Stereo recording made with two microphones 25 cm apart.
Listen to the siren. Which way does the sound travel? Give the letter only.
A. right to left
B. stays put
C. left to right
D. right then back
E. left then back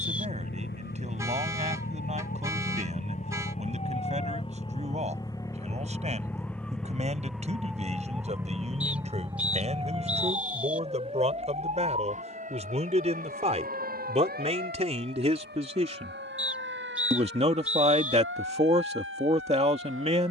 C.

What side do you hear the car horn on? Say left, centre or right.
centre.